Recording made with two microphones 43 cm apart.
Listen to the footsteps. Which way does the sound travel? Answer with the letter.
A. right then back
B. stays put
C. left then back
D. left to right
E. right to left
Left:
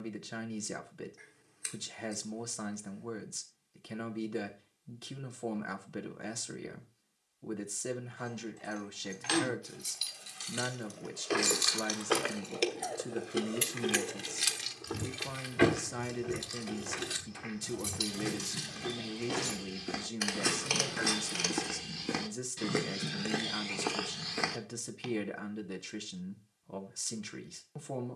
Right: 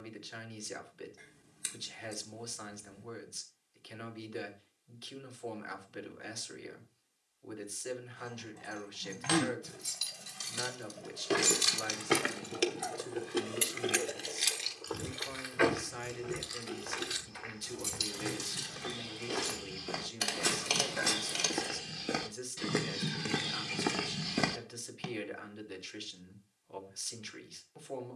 D.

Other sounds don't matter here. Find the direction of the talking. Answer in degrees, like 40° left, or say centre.
60° left.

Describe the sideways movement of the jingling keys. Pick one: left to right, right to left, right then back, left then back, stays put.
right to left.